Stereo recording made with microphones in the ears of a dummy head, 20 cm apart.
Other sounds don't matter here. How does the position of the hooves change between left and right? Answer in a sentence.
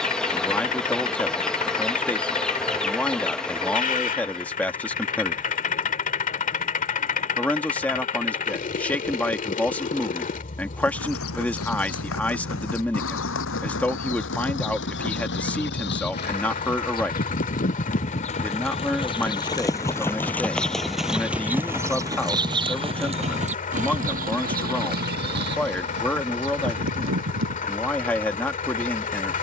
In this clip you hear the hooves go from the left side to the right.